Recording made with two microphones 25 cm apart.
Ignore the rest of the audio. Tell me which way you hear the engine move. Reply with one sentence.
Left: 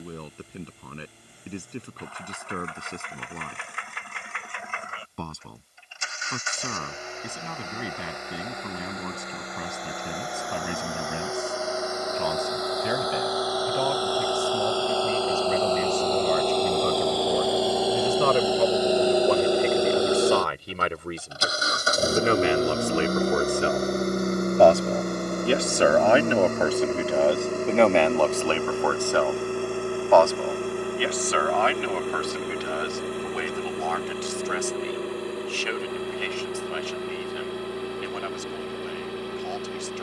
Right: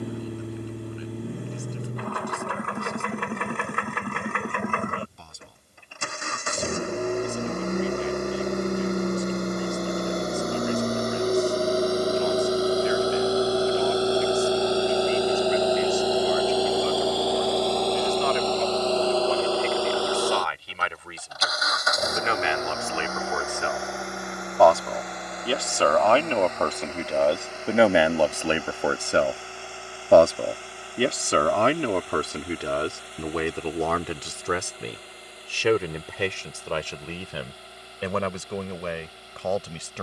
You can hear the engine go from the right side to the left.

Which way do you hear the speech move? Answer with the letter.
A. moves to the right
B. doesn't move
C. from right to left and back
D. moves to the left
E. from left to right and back
A.